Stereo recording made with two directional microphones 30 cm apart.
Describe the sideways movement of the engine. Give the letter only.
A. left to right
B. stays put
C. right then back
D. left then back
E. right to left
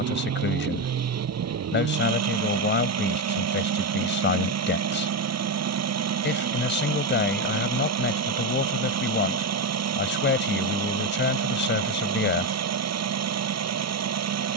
B.